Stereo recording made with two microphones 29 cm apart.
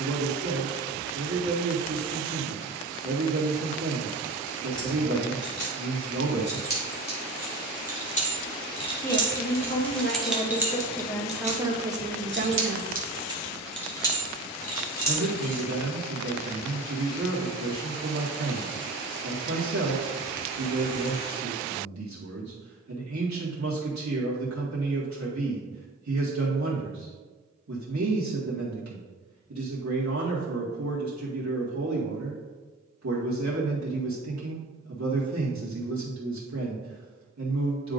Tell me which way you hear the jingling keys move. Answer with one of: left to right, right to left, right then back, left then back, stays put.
right then back.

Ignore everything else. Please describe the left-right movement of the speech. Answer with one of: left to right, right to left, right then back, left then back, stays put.
left then back.